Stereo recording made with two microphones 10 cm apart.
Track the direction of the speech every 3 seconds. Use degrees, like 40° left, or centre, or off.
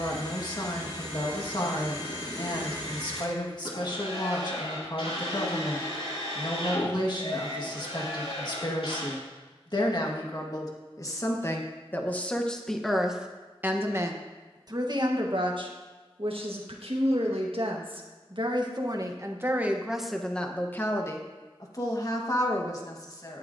40° left, 40° left, 40° left, 40° left, 10° right, 60° right, 20° right, 30° left.